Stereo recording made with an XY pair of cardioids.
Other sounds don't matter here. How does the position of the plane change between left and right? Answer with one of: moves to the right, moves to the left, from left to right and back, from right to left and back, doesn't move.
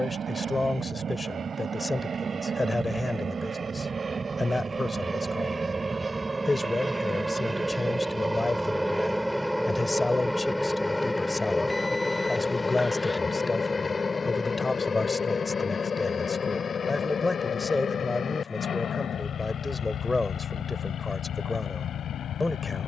moves to the left.